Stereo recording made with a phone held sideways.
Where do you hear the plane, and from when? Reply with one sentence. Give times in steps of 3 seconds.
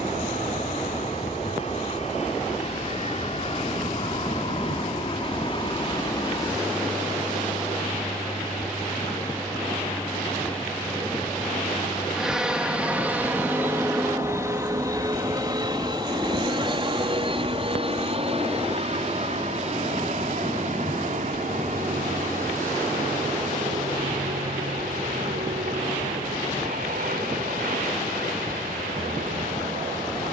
In this clip you hear the plane on the left from 0 s, in the centre from 9 s and on the right from 15 s.